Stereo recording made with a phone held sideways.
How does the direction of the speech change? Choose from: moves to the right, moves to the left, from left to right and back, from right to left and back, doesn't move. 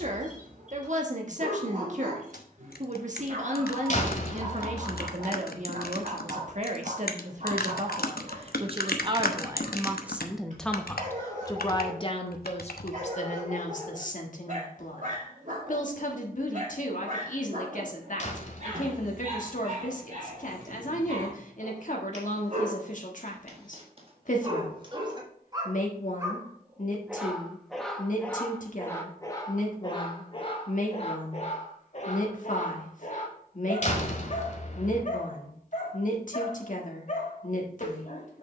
moves to the left.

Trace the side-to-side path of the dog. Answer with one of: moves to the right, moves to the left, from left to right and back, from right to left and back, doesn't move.
moves to the left.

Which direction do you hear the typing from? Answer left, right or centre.
left.